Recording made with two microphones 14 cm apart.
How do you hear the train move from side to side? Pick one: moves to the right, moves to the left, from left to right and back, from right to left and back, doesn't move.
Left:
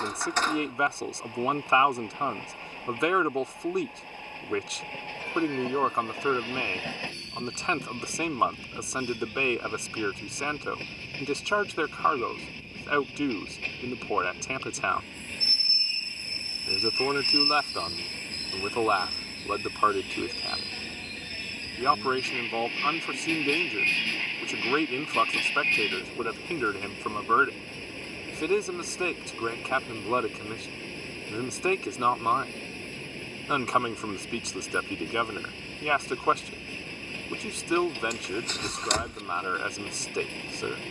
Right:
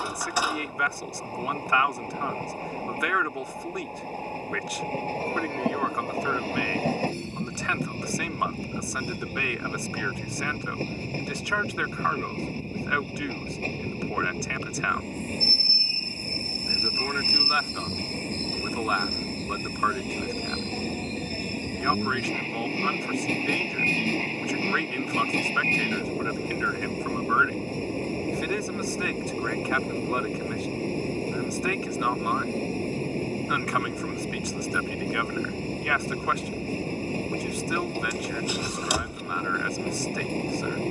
doesn't move.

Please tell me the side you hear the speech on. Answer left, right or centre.
left.